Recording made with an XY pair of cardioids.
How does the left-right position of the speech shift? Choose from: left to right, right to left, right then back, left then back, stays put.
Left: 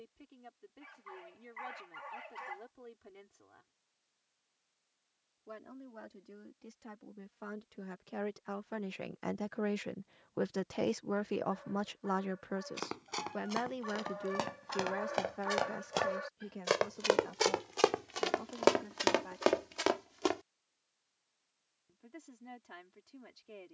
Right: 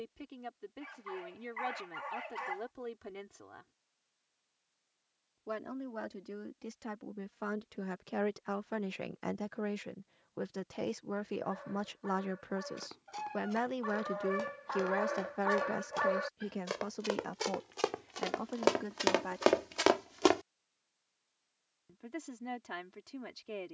left then back.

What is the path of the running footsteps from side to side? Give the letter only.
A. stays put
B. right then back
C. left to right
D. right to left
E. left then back
C.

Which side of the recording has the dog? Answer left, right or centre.
right.